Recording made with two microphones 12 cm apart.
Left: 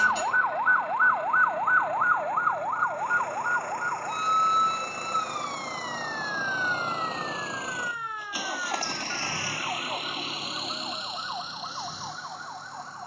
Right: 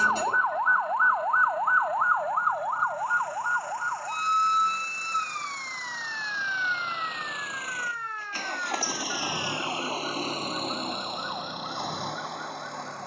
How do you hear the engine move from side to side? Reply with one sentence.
In this clip you hear the engine go from the left side to the right.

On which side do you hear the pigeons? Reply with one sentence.
In this clip you hear the pigeons on the right.